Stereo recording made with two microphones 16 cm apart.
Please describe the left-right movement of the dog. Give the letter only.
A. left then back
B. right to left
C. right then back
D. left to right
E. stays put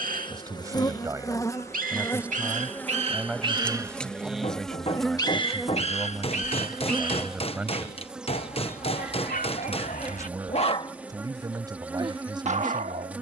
A.